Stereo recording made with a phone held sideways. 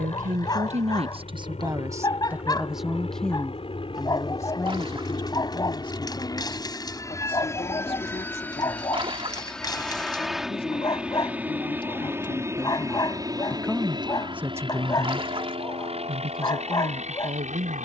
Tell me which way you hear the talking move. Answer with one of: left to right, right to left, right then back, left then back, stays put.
left then back.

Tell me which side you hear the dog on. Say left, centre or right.
left.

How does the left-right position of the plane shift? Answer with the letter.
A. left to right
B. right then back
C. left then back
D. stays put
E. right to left
A.